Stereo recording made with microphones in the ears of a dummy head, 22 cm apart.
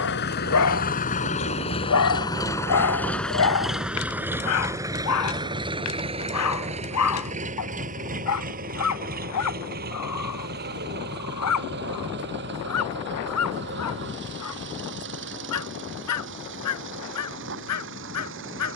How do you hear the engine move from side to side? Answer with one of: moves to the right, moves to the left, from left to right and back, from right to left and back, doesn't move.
moves to the right.